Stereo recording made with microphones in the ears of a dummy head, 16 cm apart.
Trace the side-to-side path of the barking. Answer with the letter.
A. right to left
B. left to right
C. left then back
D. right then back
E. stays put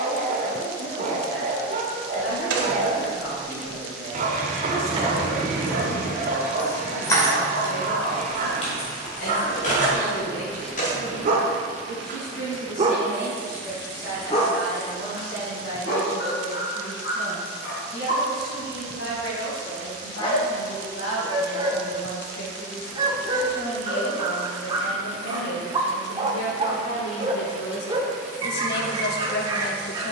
C.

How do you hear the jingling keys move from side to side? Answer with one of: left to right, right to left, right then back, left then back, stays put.
right to left.